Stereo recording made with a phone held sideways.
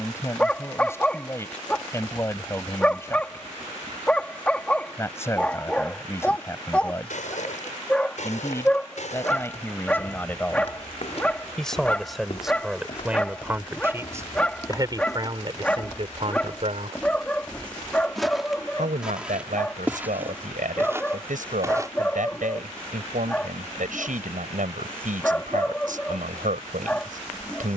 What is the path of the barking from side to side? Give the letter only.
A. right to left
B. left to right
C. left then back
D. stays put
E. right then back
D.